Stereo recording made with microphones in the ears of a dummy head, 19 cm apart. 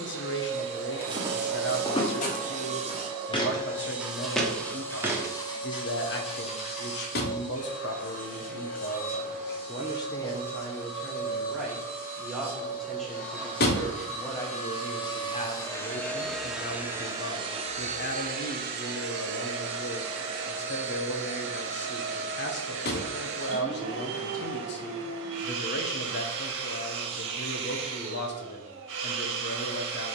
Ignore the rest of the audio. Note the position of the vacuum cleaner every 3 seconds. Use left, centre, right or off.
right, centre, left, left, left, centre, right, right, right, right.